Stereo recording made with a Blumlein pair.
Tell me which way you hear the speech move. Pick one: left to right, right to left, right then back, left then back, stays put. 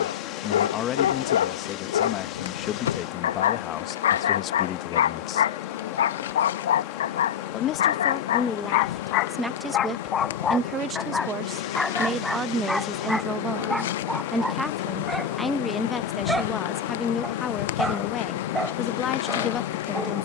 right then back.